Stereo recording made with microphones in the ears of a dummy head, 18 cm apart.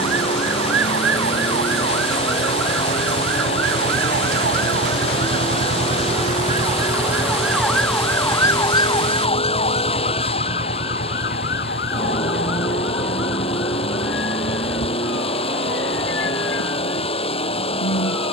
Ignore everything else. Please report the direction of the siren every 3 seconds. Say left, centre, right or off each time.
right, right, centre, left, left, left.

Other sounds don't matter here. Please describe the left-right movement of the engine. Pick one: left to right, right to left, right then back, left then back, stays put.
stays put.